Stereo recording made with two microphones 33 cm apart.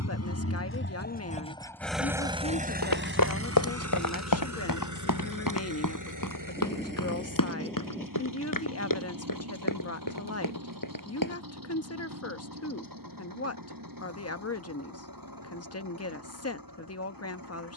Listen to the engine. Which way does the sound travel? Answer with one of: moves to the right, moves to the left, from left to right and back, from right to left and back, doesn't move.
moves to the right.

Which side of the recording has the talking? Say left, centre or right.
left.